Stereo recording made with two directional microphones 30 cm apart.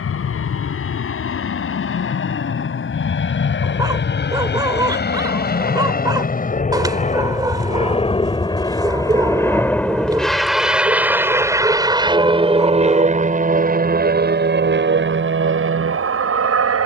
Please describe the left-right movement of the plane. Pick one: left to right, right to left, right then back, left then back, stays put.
left to right.